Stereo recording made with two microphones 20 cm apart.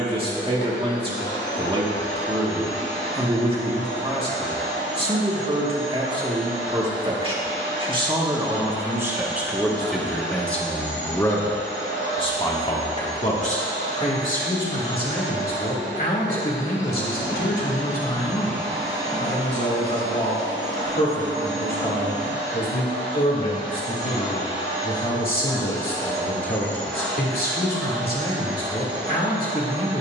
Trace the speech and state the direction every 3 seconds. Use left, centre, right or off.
right, right, right, centre, left, left, left, left, left, left.